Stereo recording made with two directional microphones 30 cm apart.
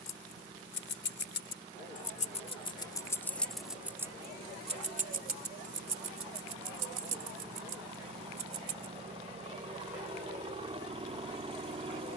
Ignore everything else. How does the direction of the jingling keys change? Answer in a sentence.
You can hear the jingling keys travel towards the right.